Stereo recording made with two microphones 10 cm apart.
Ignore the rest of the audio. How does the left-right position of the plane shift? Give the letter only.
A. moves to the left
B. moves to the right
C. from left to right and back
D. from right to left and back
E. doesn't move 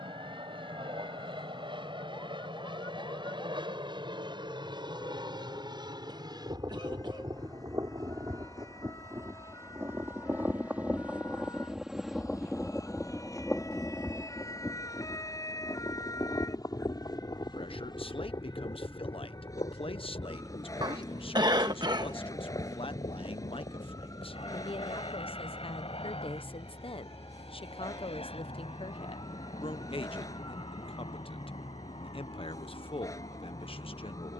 A.